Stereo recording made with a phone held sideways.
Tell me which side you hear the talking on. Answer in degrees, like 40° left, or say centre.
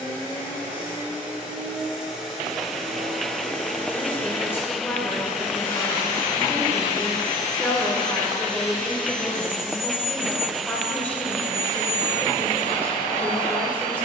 10° left.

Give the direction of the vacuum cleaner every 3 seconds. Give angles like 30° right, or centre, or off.
10° right, 20° left, 40° left, 60° left, 70° left.